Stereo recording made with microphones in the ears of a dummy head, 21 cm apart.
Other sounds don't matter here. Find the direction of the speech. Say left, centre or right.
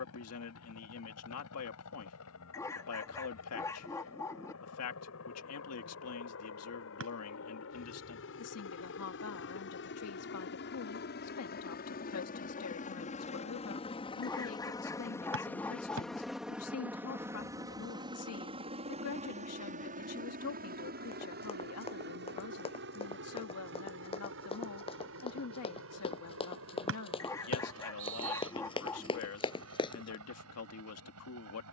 left.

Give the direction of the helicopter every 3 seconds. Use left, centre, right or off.
left, left, left, left, left, centre, right, right, right, right, right.